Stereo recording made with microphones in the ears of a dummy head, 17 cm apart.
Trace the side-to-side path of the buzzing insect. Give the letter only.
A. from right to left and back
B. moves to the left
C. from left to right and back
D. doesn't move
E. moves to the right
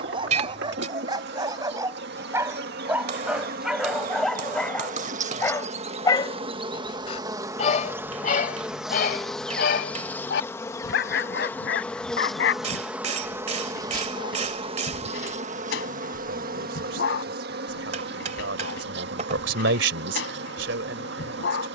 A.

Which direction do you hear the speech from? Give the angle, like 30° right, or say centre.
70° right.